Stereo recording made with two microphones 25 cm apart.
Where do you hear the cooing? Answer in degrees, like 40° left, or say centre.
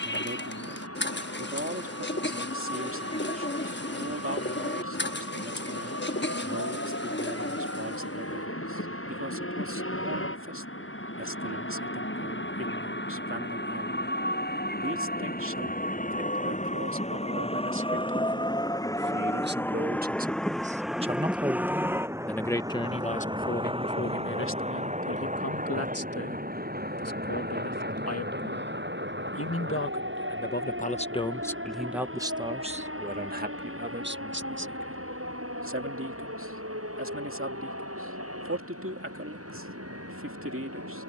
40° left.